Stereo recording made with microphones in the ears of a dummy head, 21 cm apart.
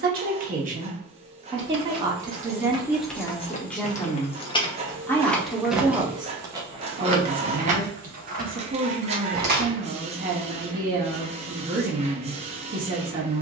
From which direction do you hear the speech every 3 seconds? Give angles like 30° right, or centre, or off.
20° right, centre, 30° right, 40° right, 40° right.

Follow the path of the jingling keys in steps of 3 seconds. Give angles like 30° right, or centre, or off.
40° right, 20° left, 30° right, 50° right, off.